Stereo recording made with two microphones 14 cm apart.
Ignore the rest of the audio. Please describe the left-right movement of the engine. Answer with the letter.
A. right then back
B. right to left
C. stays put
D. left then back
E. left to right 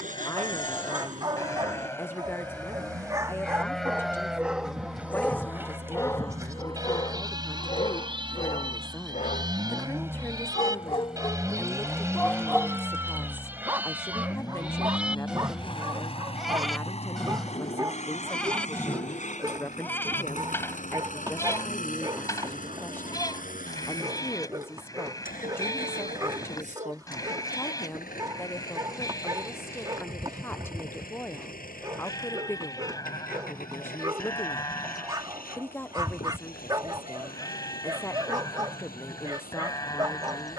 B.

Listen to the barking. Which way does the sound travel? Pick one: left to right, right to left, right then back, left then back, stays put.
left then back.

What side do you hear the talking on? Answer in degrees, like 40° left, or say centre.
10° left.